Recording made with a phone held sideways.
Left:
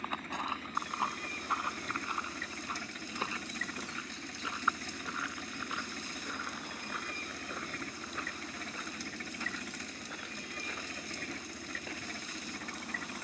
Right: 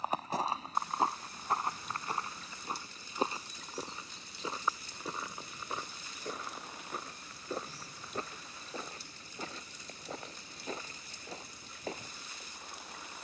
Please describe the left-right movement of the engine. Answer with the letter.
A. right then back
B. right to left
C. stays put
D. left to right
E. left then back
C.